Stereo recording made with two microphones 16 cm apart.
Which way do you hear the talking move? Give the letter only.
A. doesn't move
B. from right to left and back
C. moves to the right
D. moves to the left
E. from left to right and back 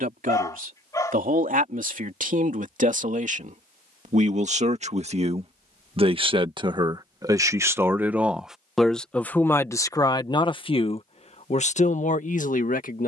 D.